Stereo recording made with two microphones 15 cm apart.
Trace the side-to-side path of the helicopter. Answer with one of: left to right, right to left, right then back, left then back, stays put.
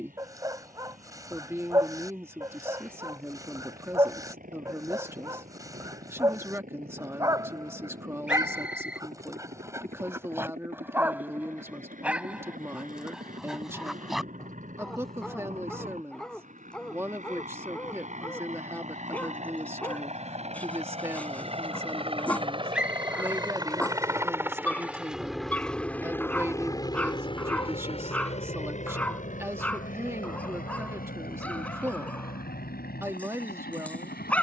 right to left.